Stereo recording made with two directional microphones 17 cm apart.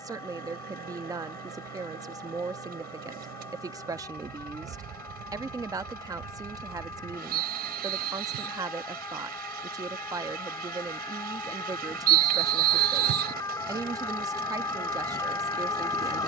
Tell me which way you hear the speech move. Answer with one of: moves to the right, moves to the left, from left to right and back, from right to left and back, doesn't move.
doesn't move.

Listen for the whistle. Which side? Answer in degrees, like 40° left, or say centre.
70° right.